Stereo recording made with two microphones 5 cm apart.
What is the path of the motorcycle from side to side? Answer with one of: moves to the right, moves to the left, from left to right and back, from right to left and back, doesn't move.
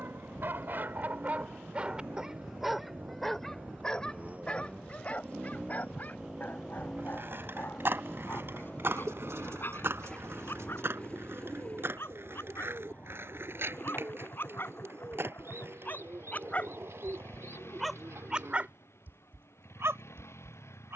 moves to the left.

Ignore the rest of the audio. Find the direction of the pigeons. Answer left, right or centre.
right.